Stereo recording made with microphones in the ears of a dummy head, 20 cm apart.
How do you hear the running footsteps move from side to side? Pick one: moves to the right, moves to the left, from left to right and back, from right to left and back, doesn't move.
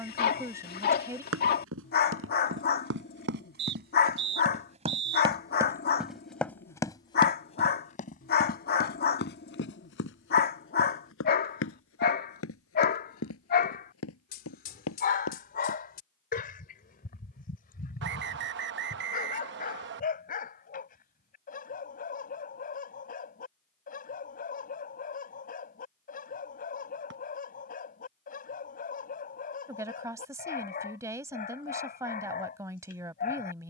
moves to the left.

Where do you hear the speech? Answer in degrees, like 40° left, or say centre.
10° right.